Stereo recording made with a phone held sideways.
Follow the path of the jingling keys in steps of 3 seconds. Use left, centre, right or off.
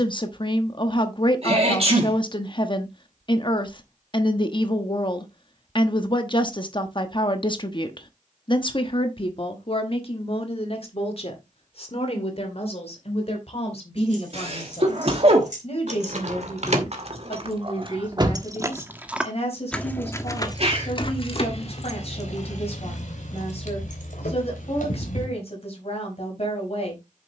off, off, off, off, right, right, centre, left, left.